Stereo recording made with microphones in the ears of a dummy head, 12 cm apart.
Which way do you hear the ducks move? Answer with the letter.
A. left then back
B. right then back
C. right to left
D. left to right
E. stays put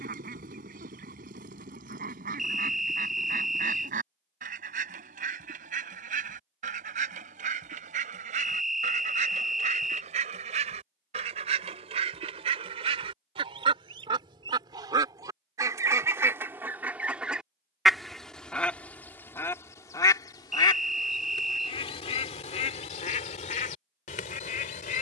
C.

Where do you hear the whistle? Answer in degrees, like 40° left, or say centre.
centre.